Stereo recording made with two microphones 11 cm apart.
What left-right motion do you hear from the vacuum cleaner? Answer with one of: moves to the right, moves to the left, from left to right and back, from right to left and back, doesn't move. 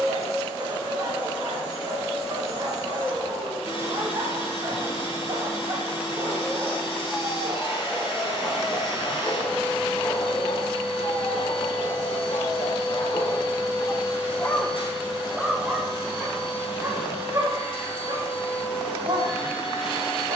doesn't move.